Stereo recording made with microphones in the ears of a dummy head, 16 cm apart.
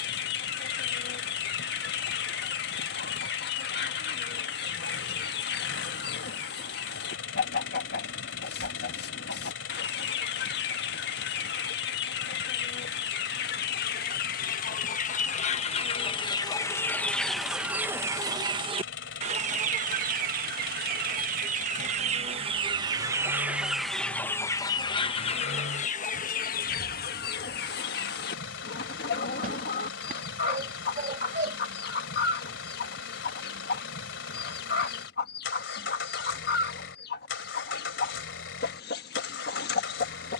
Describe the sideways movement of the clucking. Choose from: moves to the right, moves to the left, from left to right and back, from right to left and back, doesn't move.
from left to right and back.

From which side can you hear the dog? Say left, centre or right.
right.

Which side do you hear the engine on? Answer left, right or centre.
left.